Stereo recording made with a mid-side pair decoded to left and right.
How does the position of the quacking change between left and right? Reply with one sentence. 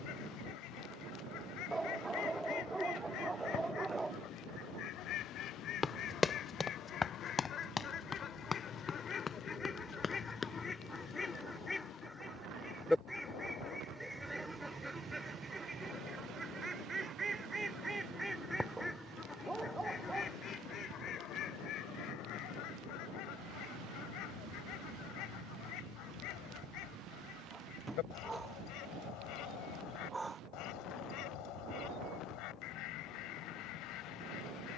You can hear the quacking move from left to right and back again.